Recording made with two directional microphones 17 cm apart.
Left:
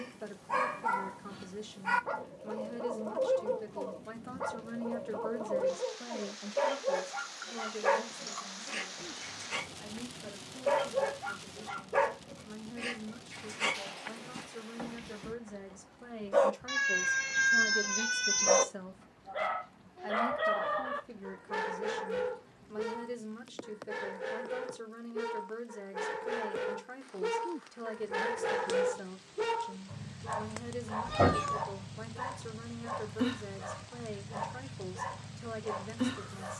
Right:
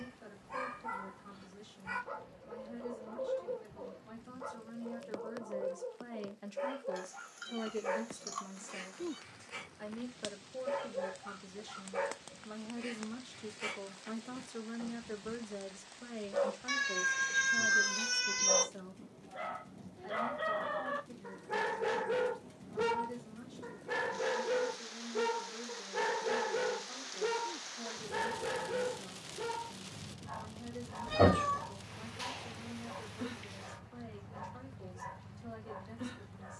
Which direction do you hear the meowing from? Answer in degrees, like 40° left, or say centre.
centre.